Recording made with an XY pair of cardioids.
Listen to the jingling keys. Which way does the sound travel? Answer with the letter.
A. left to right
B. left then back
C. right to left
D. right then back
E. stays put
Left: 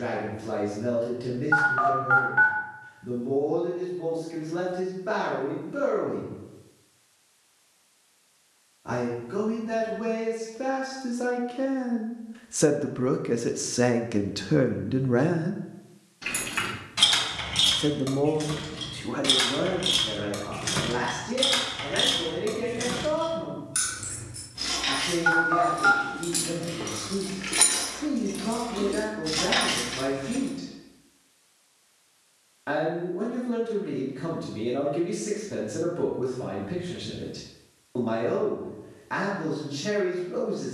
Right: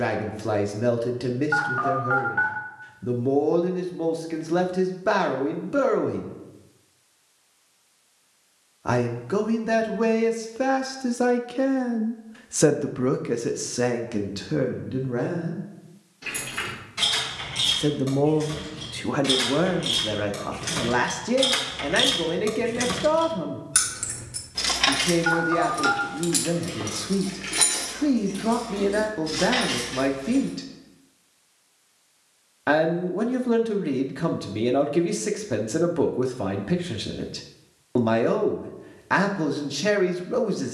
D.